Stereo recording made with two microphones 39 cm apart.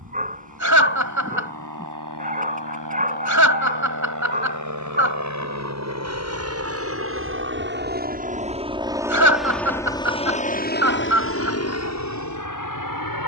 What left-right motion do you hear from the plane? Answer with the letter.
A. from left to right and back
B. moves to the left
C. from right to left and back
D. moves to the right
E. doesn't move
B.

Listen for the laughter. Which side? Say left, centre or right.
right.